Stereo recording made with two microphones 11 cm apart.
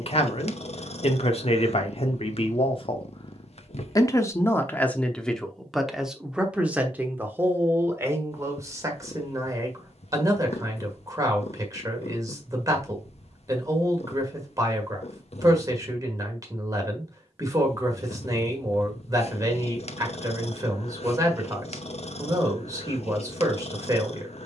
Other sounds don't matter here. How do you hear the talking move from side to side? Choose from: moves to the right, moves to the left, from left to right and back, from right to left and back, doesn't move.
moves to the right.